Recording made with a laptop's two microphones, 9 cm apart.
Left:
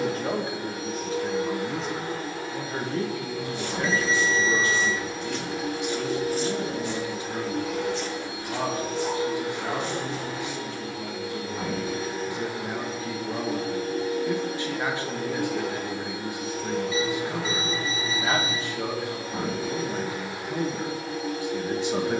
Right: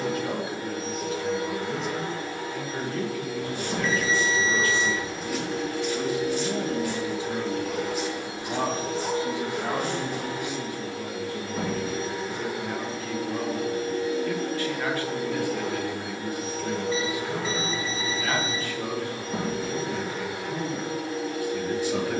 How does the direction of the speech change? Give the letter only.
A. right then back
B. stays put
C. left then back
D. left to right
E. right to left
A.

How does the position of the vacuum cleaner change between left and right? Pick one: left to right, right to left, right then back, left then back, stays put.
stays put.